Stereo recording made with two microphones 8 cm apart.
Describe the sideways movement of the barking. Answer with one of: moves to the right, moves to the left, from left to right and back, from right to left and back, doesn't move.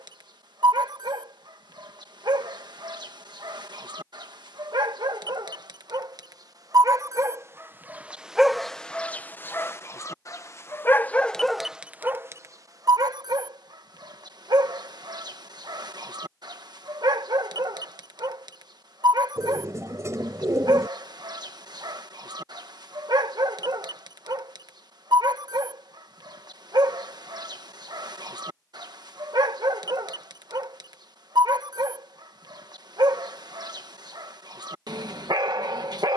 from right to left and back.